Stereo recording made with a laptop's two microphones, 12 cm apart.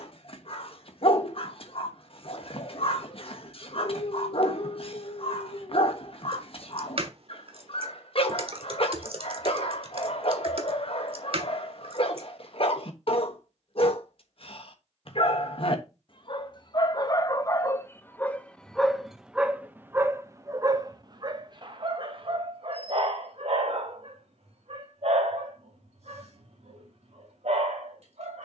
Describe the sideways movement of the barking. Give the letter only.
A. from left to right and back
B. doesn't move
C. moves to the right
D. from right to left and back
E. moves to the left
C.